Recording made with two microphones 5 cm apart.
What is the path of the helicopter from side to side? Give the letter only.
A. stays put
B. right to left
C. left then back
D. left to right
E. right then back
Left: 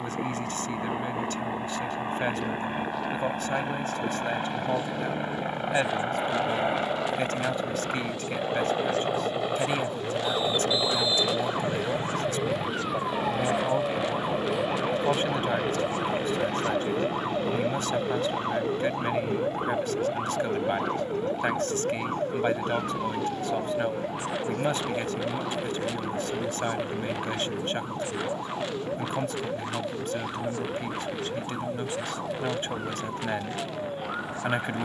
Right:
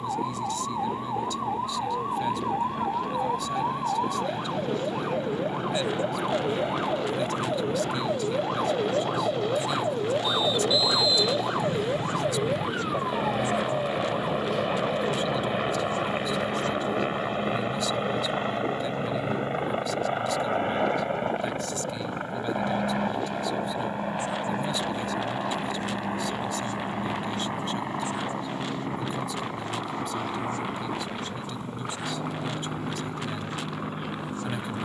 D.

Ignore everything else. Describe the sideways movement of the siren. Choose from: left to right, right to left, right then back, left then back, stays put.
right to left.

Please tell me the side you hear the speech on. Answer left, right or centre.
left.